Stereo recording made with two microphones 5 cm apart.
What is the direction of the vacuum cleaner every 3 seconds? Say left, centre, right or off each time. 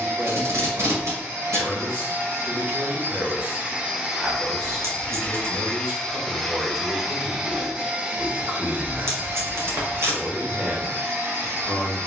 right, centre, centre, right.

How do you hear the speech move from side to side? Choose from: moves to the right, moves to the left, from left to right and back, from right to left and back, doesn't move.
doesn't move.